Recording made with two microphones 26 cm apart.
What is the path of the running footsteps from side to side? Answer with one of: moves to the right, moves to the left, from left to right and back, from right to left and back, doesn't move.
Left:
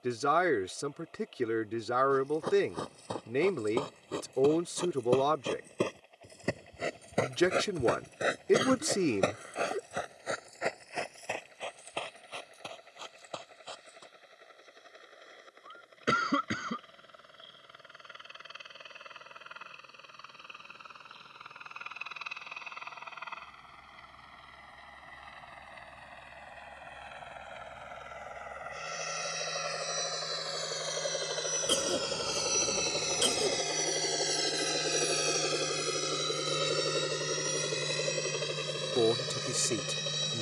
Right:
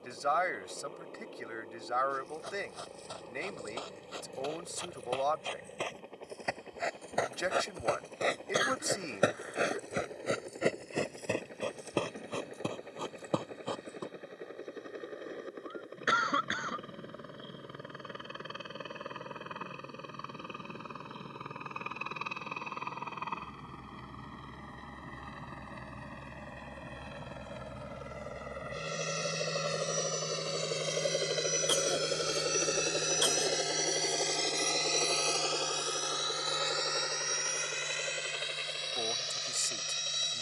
moves to the right.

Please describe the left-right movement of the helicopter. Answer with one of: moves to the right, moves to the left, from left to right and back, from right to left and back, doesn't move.
moves to the left.